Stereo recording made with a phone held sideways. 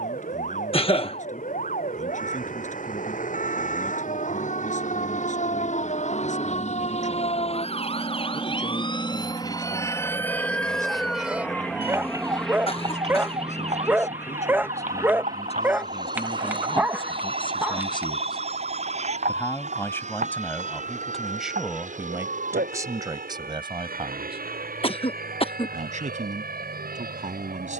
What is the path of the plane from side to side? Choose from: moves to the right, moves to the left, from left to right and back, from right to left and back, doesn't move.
moves to the right.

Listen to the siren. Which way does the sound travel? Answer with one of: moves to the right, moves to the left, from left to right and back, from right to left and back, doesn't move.
moves to the right.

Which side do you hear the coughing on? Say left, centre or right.
left.